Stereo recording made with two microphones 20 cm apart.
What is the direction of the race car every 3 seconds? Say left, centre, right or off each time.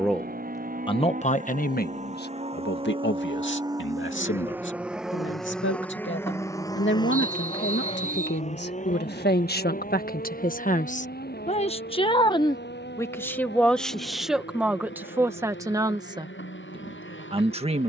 right, centre, left, left, left, left.